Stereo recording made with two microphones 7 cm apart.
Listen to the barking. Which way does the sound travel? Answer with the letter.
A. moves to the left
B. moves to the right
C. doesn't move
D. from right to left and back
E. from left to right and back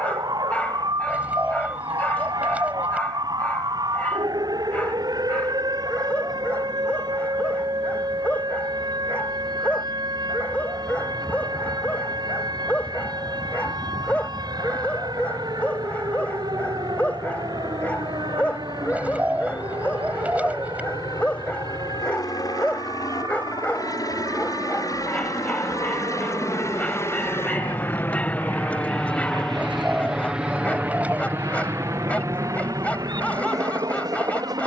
C.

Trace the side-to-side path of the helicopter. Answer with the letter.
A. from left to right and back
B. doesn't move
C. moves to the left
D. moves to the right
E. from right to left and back
D.